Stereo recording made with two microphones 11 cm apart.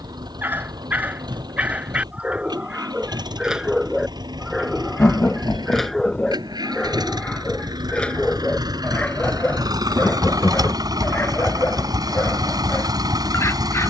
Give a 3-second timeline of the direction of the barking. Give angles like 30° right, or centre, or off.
10° right, centre, 10° left, 20° left, 20° left.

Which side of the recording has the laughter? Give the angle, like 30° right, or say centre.
20° left.